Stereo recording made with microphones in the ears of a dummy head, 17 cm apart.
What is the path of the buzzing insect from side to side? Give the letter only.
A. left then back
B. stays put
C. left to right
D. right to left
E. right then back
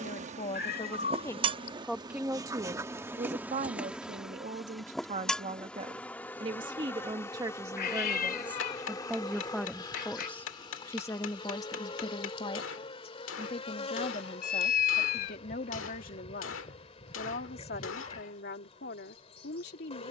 D.